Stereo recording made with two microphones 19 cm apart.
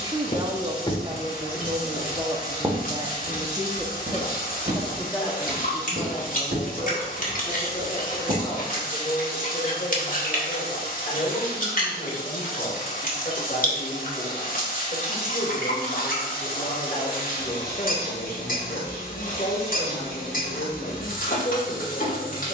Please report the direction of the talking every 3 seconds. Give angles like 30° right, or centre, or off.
30° right, centre, 30° left, 40° left, 40° left, 40° left, 40° left, 40° left.